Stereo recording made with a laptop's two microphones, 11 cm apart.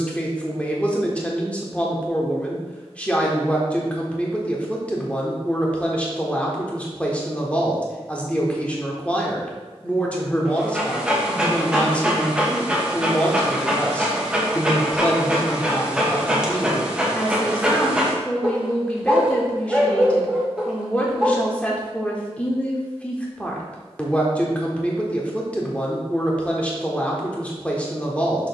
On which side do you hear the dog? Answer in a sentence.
In this clip you hear the dog in the centre.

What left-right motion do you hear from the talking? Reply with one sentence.
In this clip you hear the talking stay put.